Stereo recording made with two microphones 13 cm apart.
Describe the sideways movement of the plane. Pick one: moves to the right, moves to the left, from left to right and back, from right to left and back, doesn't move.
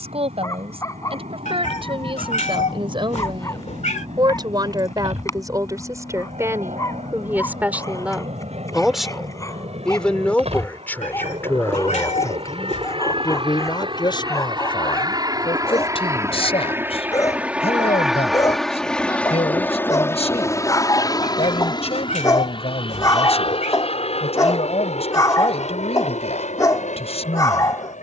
moves to the left.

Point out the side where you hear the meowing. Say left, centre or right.
left.